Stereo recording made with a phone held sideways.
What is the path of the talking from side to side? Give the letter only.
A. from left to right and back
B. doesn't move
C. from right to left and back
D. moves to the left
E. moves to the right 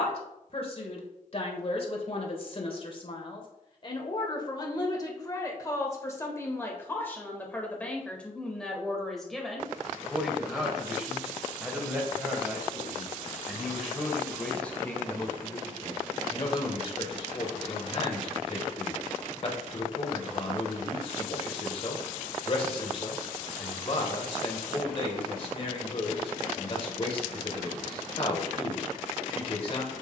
A.